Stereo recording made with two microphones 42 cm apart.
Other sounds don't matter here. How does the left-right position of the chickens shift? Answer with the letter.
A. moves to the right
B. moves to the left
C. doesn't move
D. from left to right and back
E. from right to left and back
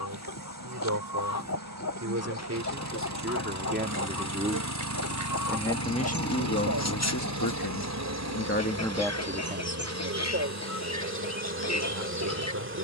C.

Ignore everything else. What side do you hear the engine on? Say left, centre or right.
right.